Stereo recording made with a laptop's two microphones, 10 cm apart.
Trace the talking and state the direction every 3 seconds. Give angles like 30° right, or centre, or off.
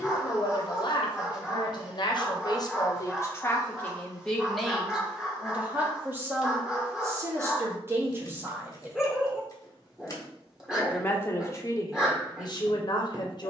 40° left, 10° left, 20° right, 30° left, 40° left.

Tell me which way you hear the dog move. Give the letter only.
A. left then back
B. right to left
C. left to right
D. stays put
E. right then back
D.